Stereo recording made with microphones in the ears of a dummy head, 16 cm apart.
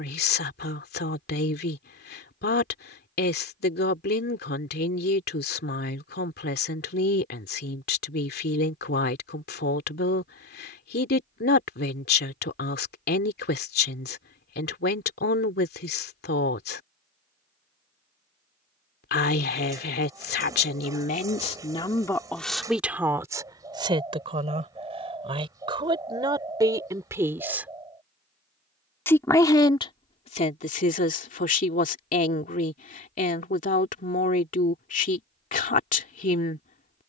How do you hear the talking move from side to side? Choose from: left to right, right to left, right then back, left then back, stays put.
right then back.